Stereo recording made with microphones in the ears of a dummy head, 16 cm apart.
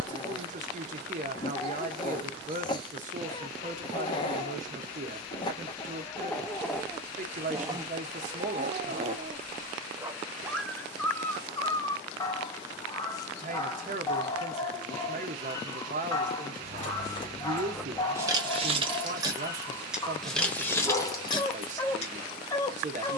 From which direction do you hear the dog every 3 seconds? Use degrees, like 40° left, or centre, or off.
30° left, 20° left, 10° right, centre, 20° left, 20° left, 20° left, 20° left.